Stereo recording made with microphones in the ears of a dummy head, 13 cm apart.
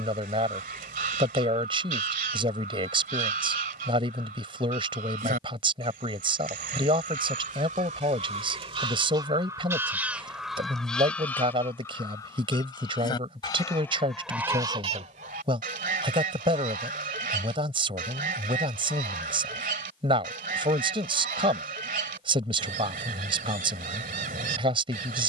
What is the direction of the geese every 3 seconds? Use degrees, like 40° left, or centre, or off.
60° right, 60° right, 50° right, centre, 10° left, 60° right, 60° right, 60° right, 60° right.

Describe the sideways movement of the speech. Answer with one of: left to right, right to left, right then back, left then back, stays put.
stays put.